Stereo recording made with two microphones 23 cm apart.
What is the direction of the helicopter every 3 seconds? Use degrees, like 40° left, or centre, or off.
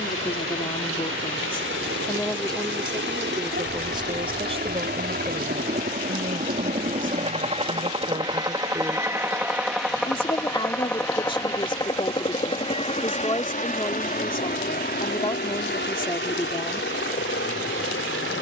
60° right, 50° right, 30° right, centre, 30° left, 50° left.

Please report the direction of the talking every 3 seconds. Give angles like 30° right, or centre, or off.
20° left, 20° right, 30° right, 20° left, 20° left, 20° left.